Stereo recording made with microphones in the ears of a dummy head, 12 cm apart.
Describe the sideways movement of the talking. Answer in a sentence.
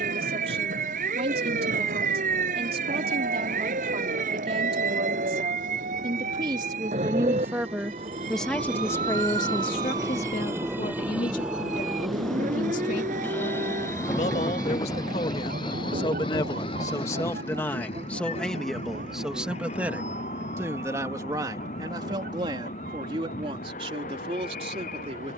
You can hear the talking go left and come back.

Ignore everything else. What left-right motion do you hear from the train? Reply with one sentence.
In this clip you hear the train move to the left.